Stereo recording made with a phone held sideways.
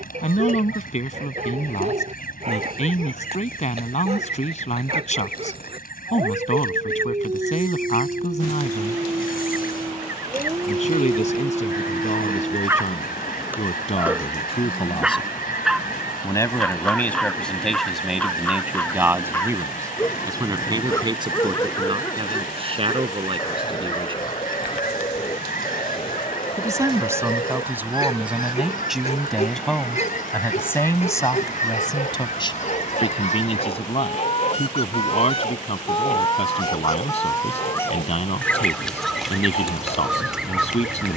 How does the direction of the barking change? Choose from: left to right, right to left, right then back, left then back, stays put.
right to left.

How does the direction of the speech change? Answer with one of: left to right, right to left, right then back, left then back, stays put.
right then back.